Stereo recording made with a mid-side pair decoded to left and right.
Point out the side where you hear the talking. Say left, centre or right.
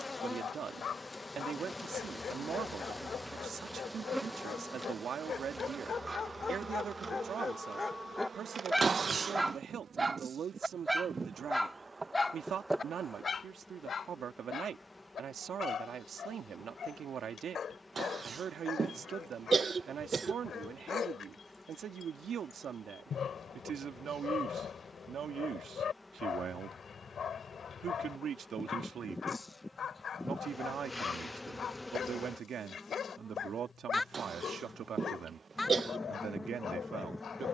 right.